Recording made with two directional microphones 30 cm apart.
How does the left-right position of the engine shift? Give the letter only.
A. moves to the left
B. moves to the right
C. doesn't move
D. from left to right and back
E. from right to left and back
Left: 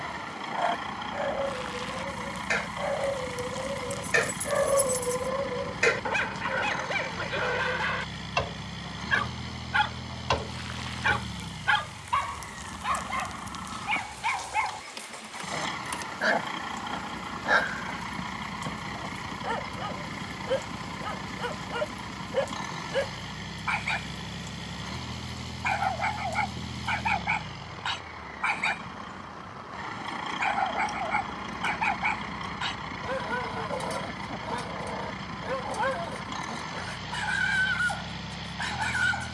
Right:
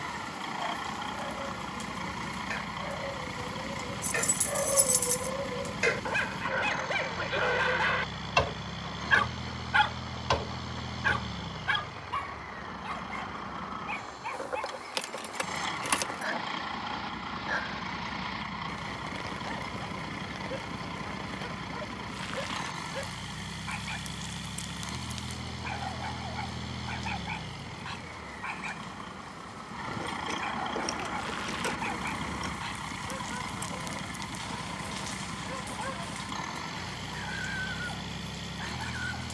C.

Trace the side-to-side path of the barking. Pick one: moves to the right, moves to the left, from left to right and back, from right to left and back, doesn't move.
from left to right and back.